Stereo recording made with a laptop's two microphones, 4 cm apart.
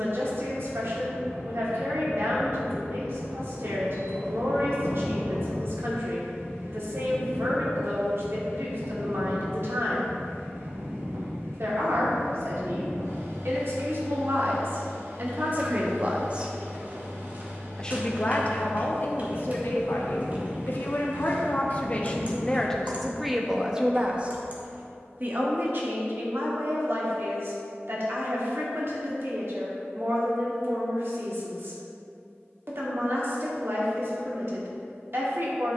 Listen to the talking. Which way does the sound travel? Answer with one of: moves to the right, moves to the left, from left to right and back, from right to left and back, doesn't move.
from right to left and back.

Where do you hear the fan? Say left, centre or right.
right.